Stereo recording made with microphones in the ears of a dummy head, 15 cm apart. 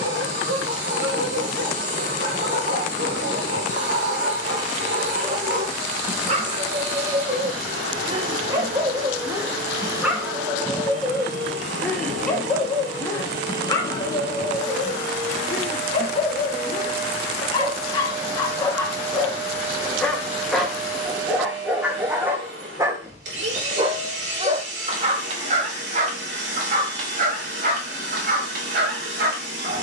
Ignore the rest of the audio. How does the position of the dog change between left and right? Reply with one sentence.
In this clip you hear the dog move from right to left and back again.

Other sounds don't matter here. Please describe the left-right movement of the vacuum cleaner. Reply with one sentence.
In this clip you hear the vacuum cleaner stay in one place.